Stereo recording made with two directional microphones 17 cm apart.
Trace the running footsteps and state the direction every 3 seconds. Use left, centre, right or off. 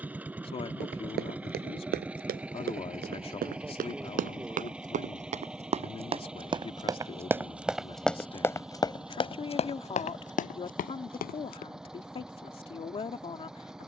right, right, centre, left, off.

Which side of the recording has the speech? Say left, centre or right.
left.